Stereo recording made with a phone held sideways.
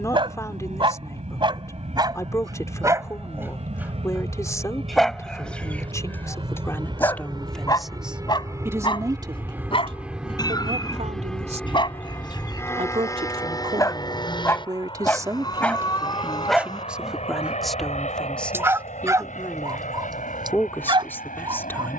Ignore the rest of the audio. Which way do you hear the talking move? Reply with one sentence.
In this clip you hear the talking go right and come back.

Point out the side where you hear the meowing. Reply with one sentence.
You can hear the meowing on the left.